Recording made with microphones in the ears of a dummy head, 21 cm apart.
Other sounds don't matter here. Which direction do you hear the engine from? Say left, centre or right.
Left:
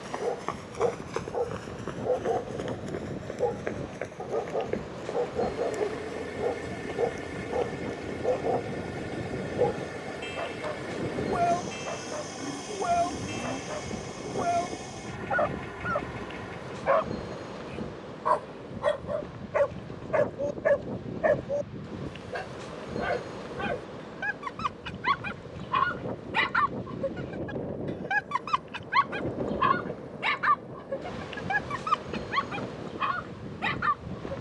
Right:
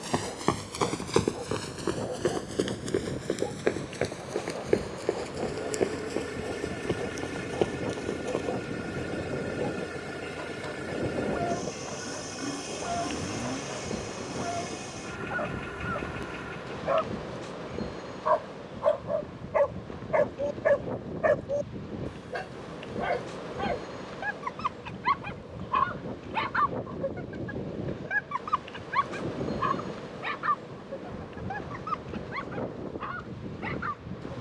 centre.